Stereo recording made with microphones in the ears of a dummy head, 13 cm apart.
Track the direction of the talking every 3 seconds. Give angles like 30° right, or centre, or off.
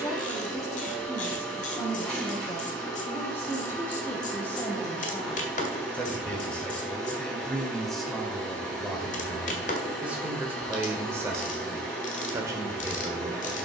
20° left, 20° left, centre, 10° right, 20° right.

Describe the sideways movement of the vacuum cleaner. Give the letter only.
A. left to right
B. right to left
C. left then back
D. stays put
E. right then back
D.